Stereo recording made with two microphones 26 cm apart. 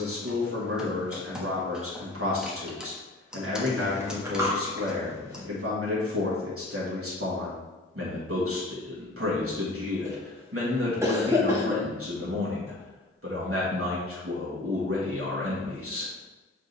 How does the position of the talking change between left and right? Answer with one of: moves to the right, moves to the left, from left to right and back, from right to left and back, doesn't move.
doesn't move.